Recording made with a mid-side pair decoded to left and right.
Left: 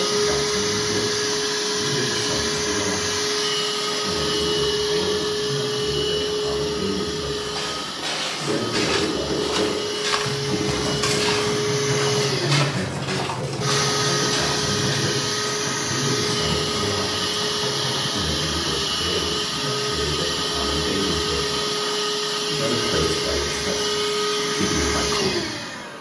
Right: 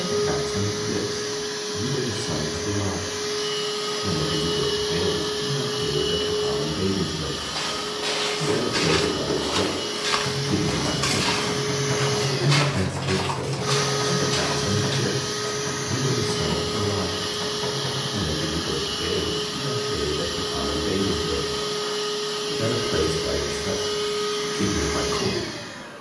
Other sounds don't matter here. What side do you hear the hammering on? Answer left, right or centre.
centre.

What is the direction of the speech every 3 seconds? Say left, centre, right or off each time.
right, right, right, right, right, right, right, centre, centre.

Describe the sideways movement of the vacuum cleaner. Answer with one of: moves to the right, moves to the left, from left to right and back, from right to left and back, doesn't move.
from left to right and back.